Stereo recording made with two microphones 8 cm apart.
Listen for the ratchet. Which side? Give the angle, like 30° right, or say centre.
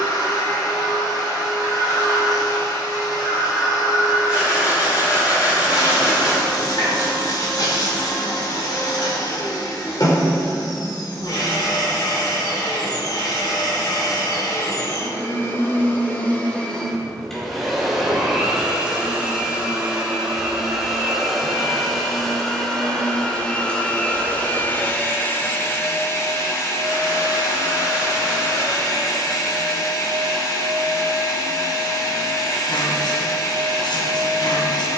70° left.